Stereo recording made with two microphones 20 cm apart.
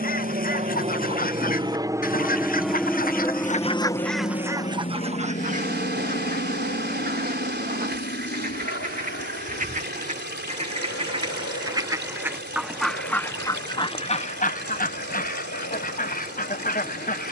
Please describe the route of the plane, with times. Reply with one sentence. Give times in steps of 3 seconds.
You can hear the plane on the right from 0 s and on the left from 3 s.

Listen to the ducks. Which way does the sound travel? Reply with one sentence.
You can hear the ducks move from left to right and back again.